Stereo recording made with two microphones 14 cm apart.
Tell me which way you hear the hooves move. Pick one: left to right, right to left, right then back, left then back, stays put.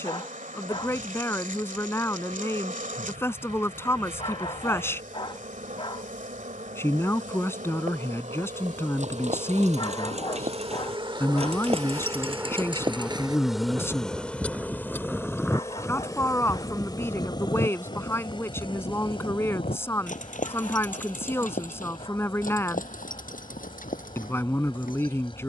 right to left.